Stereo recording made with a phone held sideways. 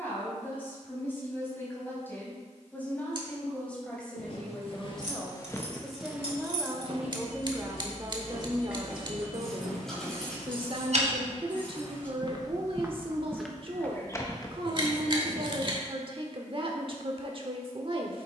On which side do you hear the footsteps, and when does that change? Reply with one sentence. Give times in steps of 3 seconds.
In this clip you hear the footsteps not at all from 0 s, on the left from 3 s, on the right from 6 s, in the centre from 12 s and not at all from 15 s.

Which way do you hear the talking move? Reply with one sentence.
You can hear the talking move from left to right.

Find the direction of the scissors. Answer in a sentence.
You can hear the scissors on the right.